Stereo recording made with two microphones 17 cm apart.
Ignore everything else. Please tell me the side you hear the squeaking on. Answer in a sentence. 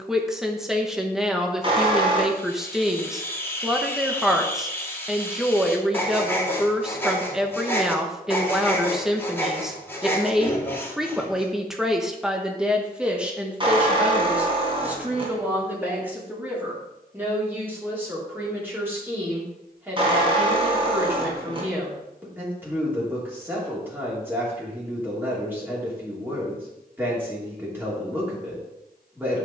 You can hear the squeaking on the right.